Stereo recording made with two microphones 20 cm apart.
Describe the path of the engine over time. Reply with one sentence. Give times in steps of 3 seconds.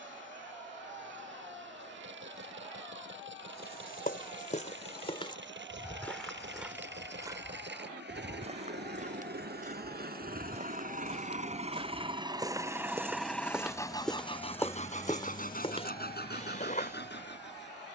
You can hear the engine on the right from 0 s, in the centre from 12 s and on the left from 15 s.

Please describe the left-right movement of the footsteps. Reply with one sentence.
You can hear the footsteps move from left to right and back again.